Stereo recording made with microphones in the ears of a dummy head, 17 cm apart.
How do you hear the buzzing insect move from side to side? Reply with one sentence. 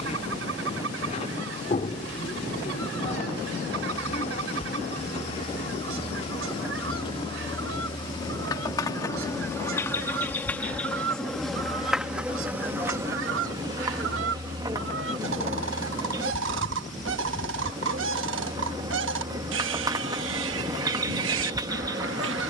You can hear the buzzing insect go from the left side to the right.